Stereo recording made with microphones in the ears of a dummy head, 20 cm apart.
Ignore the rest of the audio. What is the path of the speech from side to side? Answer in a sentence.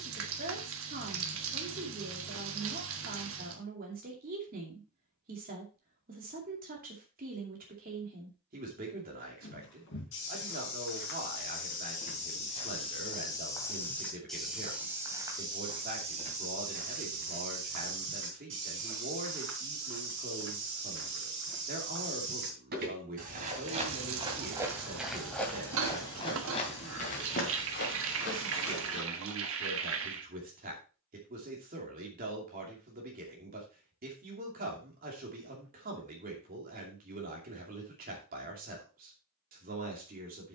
In this clip you hear the speech stay put.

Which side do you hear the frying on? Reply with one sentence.
You can hear the frying on the right.